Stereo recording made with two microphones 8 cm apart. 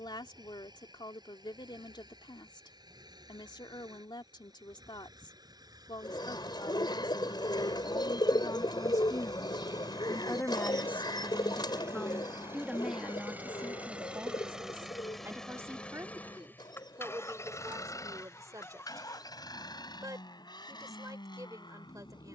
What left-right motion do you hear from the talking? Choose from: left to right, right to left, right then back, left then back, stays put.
left to right.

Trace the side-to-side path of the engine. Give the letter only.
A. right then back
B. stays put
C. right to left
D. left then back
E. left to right
C.